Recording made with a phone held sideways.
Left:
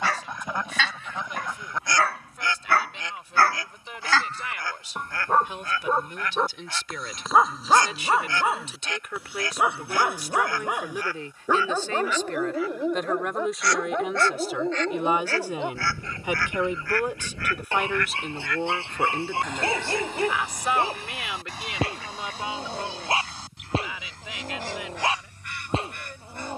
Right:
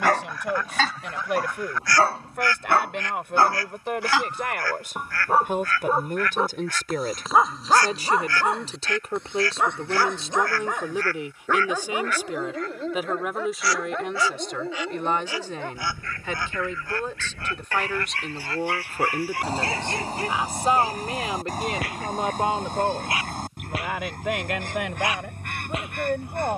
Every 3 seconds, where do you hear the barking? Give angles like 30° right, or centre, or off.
40° right, 10° right, centre, 10° left, 20° left, 20° left, 20° left, 30° left, 30° left.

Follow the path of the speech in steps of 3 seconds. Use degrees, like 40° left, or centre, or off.
70° right, 60° right, 40° right, 20° right, centre, 10° left, 10° right, 50° right, 70° right.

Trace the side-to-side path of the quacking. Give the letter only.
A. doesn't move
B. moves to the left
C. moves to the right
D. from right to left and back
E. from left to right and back
C.